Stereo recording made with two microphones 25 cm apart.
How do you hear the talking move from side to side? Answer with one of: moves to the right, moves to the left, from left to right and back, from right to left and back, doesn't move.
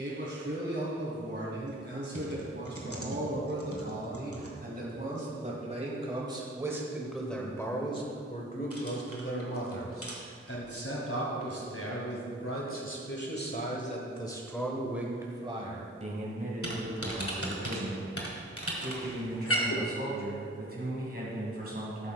from right to left and back.